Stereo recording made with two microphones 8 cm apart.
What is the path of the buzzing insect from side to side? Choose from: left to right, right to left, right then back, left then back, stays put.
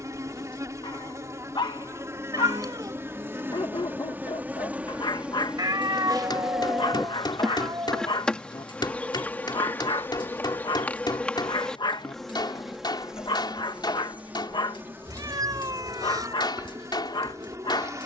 left then back.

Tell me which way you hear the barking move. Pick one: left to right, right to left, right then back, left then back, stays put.
stays put.